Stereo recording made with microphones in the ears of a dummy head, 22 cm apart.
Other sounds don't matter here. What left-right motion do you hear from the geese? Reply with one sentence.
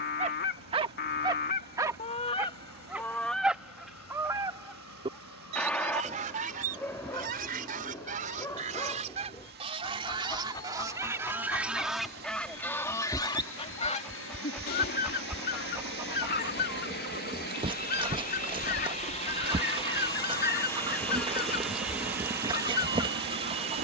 In this clip you hear the geese go right and come back.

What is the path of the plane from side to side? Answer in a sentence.
You can hear the plane move from left to right.